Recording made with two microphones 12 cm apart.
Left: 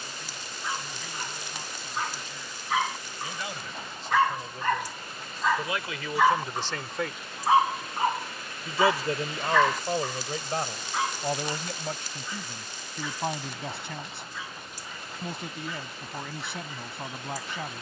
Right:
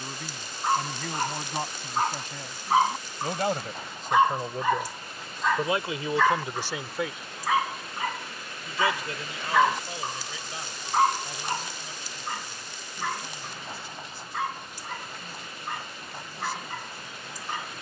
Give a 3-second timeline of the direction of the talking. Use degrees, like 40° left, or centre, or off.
60° right, 40° right, centre, 50° left, 70° left, 70° left.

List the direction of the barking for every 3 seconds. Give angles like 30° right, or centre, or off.
50° right, 10° right, 20° left, 30° right, 60° right, 60° right.